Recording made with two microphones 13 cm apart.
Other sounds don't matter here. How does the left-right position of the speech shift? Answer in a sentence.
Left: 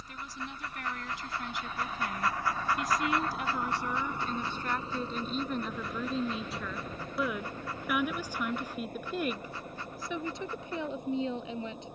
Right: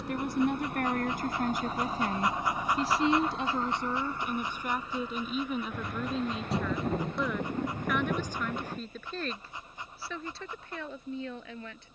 In this clip you hear the speech move from right to left.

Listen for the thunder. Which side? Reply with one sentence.
In this clip you hear the thunder on the right.